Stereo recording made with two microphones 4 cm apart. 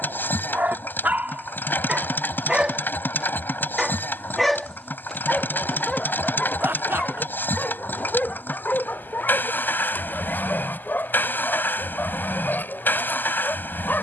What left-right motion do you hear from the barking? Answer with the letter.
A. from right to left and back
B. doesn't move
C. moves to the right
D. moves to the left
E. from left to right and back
D.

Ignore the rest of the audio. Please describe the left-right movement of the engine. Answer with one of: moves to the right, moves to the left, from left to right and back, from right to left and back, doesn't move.
doesn't move.